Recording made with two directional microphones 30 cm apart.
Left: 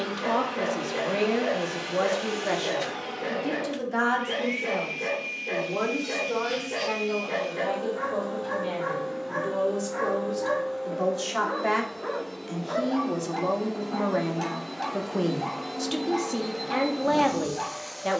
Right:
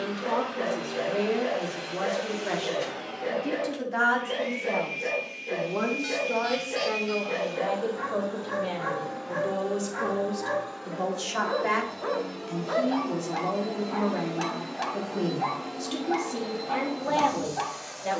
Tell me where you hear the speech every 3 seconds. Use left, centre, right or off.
left, centre, centre, centre, left, left.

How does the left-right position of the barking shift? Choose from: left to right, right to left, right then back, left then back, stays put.
left to right.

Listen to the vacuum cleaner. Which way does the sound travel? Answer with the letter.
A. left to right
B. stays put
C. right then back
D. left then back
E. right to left
C.